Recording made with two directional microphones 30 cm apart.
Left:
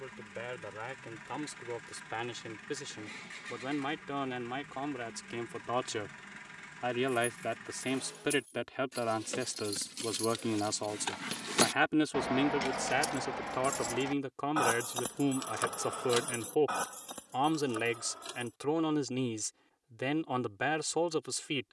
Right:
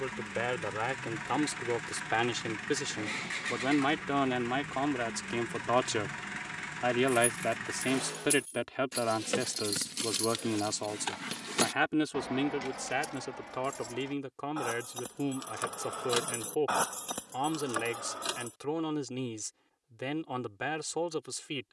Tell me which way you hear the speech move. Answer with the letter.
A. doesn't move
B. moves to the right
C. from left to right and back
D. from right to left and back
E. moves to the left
E.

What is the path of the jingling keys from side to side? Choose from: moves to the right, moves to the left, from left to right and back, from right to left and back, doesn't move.
from right to left and back.